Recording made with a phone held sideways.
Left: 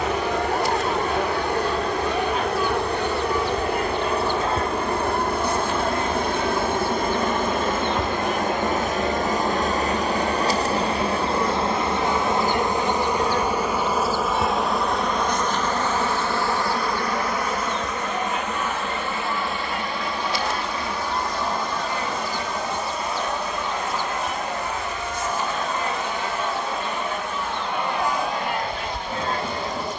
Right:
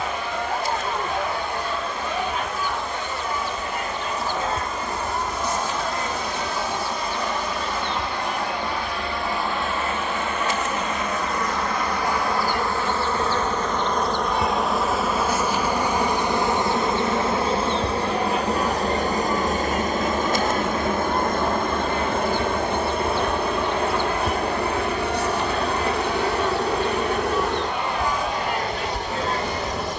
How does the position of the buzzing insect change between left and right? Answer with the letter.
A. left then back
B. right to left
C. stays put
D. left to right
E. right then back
D.